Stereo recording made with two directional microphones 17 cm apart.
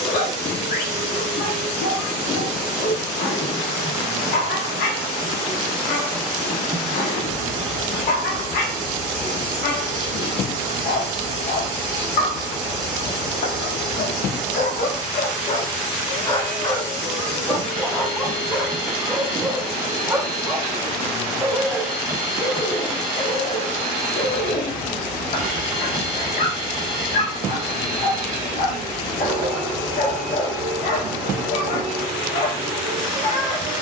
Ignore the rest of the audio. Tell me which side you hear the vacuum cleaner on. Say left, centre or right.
right.